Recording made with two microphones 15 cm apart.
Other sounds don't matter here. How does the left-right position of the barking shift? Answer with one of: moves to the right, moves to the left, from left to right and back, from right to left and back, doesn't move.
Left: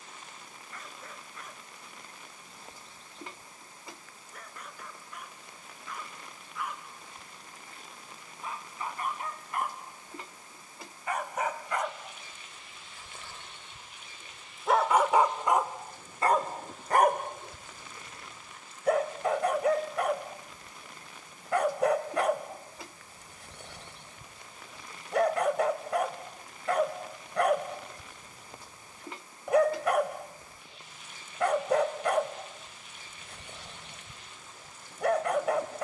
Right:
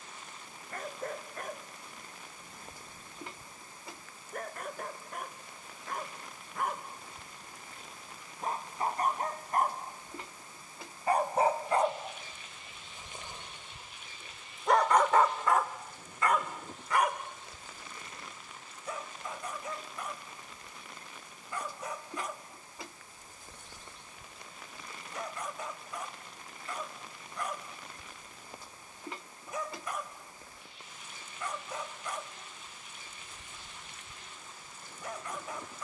moves to the left.